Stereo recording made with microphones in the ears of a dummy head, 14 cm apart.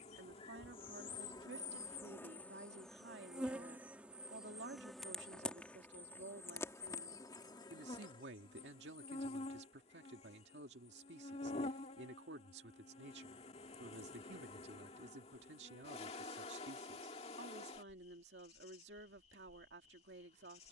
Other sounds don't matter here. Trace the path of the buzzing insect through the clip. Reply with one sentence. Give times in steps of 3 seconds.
In this clip you hear the buzzing insect on the left from 0 s, in the centre from 3 s and on the left from 6 s.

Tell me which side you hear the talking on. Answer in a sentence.
In this clip you hear the talking on the right.